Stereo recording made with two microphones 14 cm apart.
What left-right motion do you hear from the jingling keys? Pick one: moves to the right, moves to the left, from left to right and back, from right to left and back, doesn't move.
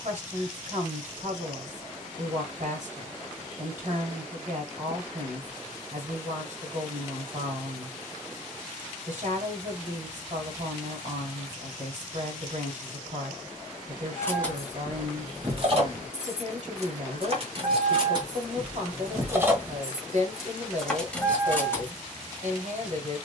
from left to right and back.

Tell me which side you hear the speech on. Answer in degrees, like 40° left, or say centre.
60° right.